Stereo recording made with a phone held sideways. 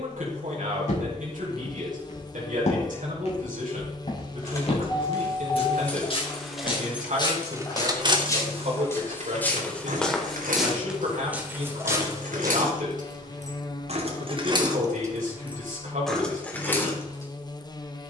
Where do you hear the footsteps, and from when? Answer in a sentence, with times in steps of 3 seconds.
You can hear the footsteps on the left from 0 s, in the centre from 9 s, on the right from 12 s and not at all from 15 s.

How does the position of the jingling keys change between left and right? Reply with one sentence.
In this clip you hear the jingling keys go right and come back.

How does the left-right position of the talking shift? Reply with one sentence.
In this clip you hear the talking stay in one place.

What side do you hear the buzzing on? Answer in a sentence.
In this clip you hear the buzzing on the left.